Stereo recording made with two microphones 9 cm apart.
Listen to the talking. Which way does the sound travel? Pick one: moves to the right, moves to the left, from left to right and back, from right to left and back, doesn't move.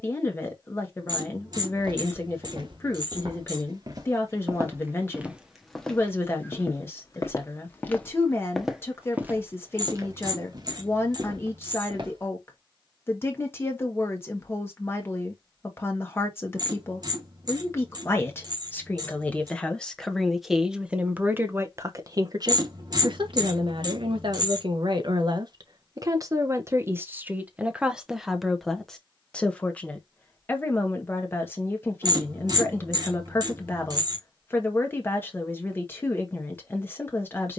from left to right and back.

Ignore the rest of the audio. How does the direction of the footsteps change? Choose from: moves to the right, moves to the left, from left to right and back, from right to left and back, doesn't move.
from right to left and back.